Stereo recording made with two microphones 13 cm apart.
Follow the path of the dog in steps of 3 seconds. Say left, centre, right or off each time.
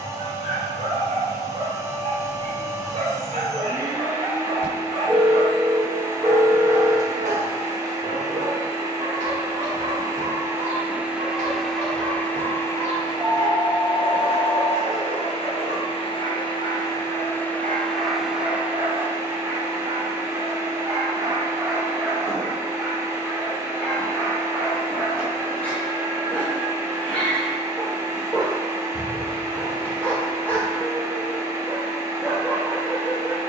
right, right, right, right, right, right, right, centre, centre, centre, centre.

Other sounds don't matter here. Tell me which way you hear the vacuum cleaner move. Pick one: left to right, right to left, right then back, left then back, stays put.
left then back.